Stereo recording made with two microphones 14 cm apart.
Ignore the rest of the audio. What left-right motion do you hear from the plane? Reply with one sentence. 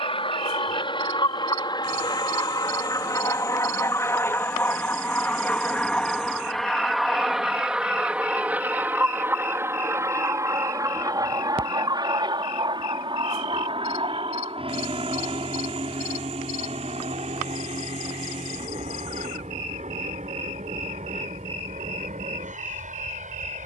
In this clip you hear the plane travel towards the right.